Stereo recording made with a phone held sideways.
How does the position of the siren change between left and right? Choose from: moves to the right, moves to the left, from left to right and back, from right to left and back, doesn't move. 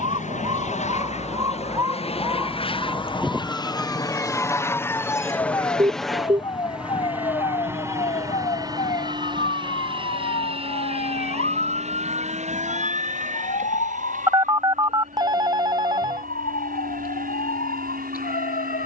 moves to the left.